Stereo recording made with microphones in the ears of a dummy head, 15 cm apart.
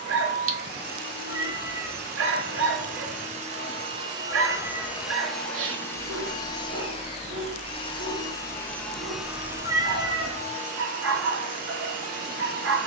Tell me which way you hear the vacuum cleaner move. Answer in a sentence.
You can hear the vacuum cleaner go left and come back.